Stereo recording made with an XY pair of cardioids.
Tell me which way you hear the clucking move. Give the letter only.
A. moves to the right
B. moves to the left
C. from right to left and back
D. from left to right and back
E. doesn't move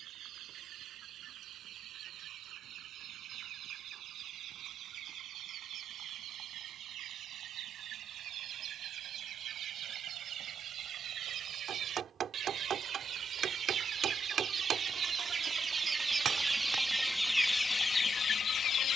B.